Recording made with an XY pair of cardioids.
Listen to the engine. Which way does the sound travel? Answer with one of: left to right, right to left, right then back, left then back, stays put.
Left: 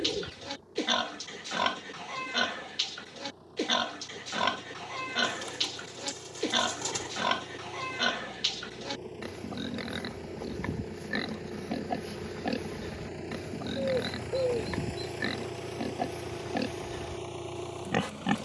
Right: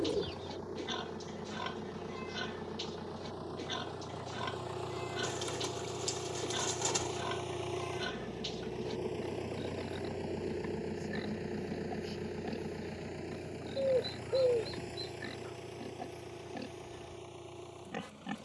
right to left.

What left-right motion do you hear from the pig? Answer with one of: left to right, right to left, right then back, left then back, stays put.
stays put.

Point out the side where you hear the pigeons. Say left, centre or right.
centre.